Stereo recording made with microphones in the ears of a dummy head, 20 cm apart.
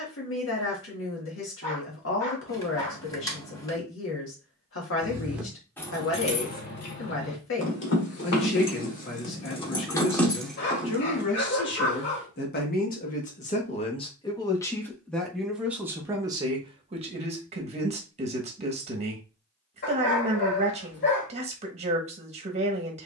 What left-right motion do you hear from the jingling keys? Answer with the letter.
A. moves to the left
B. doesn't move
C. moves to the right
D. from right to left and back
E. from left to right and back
D.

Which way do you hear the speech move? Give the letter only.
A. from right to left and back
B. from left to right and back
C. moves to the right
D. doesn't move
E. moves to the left
C.